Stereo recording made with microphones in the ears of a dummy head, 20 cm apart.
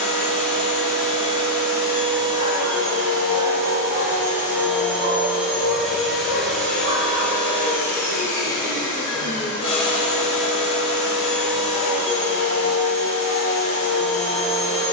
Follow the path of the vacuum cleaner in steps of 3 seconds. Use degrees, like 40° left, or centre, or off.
30° right, 10° right, 10° left, 30° left, 30° left.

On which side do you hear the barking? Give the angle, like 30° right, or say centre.
60° right.